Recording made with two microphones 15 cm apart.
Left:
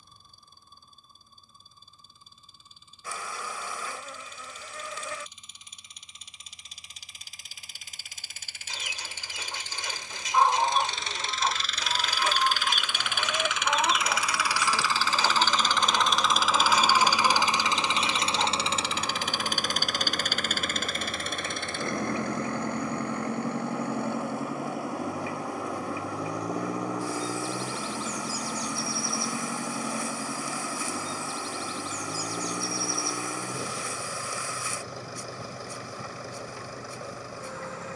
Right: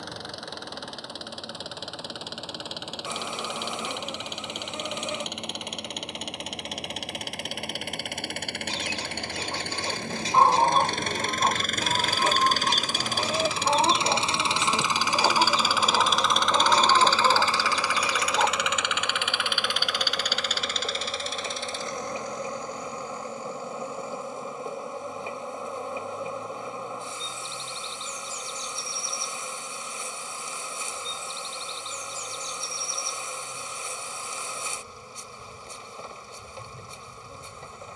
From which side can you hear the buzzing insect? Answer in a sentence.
You can hear the buzzing insect on the right.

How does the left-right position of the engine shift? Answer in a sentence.
In this clip you hear the engine go from the right side to the left.